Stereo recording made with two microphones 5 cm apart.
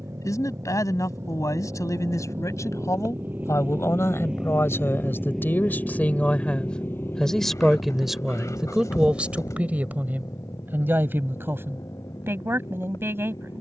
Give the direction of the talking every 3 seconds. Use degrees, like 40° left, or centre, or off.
70° left, 50° left, 10° left, 30° right, 40° right.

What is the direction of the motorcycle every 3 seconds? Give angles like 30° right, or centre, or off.
50° right, 10° right, 40° left, 70° left, 70° left.